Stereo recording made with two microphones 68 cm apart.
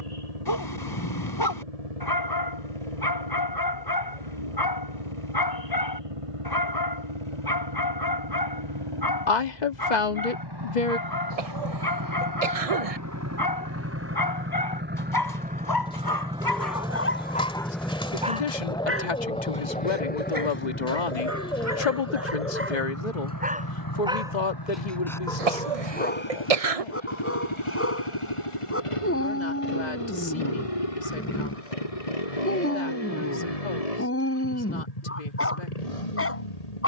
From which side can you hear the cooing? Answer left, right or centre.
centre.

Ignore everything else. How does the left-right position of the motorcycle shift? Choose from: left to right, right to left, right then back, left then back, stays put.
right to left.